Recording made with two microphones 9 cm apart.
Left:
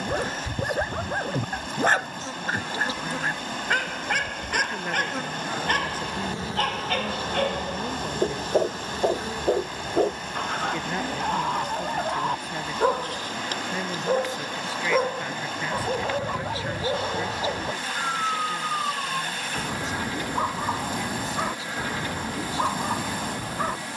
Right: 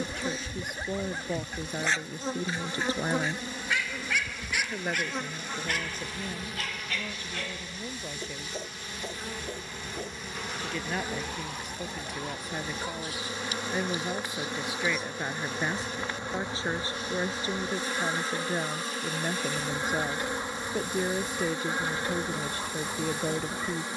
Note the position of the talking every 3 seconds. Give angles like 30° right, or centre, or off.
50° right, 10° right, 20° left, centre, 10° right, 30° right, 50° right, 50° right.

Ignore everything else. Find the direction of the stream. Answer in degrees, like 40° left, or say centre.
80° left.